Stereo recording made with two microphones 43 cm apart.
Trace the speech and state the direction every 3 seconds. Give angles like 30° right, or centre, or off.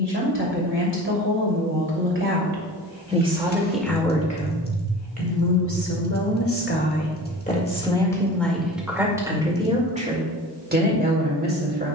30° right, 20° left, 20° left, 20° right.